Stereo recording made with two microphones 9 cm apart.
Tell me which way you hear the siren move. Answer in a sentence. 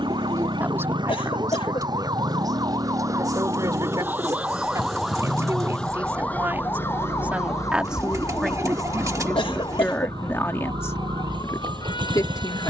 In this clip you hear the siren travel towards the left.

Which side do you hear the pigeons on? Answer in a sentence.
In this clip you hear the pigeons on the right.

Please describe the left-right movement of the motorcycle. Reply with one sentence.
In this clip you hear the motorcycle stay in one place.